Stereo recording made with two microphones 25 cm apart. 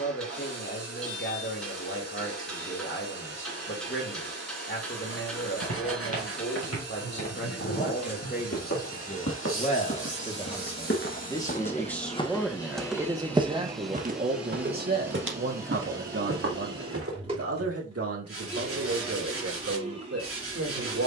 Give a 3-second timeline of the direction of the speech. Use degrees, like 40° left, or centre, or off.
50° left, 50° left, 40° left, 20° left, 20° right, 60° right, 70° right.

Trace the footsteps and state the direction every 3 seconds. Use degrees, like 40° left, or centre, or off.
off, 80° left, 70° left, 50° left, 20° right, 60° right, off.